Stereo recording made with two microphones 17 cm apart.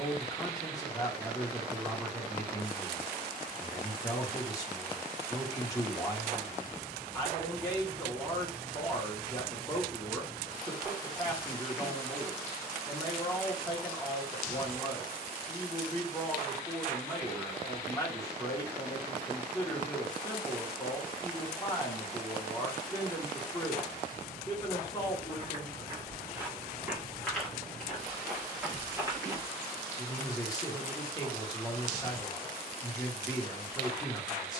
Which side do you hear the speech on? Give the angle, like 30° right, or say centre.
20° left.